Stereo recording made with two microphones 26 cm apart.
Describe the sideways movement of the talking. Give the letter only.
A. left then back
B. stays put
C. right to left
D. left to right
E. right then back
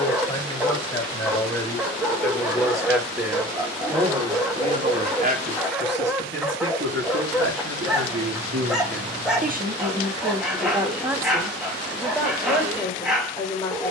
E.